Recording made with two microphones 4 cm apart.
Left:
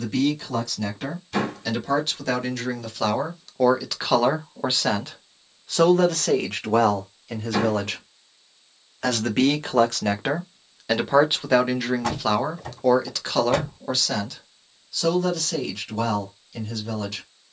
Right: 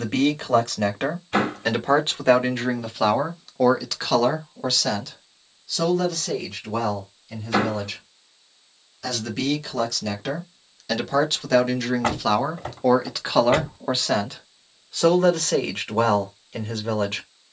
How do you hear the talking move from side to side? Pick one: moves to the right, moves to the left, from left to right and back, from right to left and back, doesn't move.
from right to left and back.